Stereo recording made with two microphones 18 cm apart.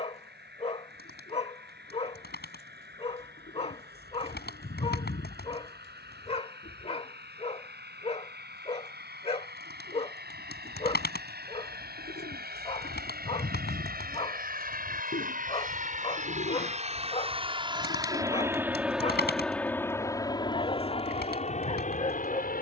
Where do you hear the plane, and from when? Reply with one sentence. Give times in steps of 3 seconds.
In this clip you hear the plane on the right from 0 s, in the centre from 18 s and on the left from 21 s.